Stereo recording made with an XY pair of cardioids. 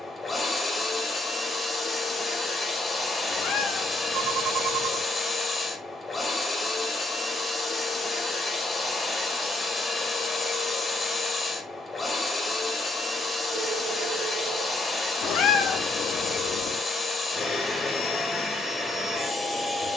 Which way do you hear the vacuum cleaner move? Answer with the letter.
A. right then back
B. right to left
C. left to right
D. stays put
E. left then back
D.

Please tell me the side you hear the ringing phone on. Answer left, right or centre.
right.